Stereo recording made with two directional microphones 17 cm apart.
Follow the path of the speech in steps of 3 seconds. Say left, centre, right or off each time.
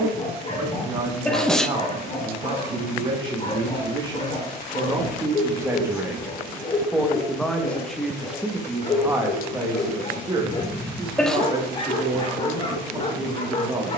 right, right, centre, right, right.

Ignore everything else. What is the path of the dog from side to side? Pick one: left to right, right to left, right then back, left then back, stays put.
stays put.